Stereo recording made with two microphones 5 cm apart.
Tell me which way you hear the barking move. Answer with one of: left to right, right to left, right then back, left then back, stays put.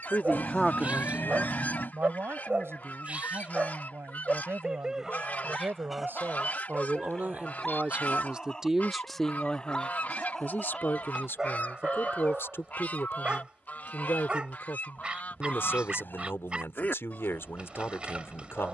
left then back.